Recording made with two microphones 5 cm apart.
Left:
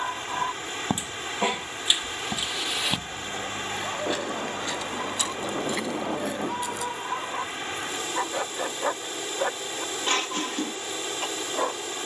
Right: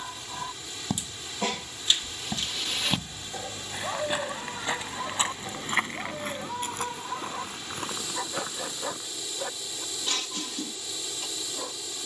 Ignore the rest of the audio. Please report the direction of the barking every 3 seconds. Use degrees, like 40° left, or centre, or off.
20° left, centre, 20° left, 50° left.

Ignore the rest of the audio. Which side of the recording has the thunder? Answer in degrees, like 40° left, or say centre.
80° left.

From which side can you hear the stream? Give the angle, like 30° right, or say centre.
50° left.